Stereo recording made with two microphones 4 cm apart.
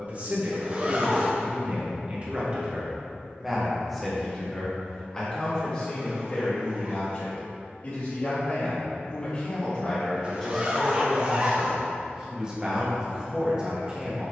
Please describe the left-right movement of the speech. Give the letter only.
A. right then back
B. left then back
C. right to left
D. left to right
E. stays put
B.